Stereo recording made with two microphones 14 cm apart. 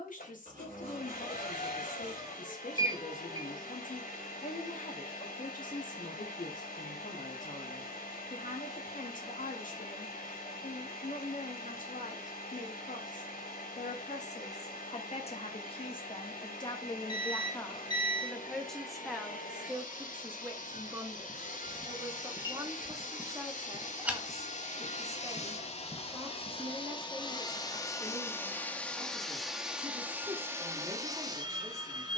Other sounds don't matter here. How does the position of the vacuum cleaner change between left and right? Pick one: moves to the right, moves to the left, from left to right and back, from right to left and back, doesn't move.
moves to the right.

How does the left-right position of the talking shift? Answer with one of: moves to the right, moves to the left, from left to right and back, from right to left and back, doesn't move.
moves to the right.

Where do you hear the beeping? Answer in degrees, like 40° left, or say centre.
30° left.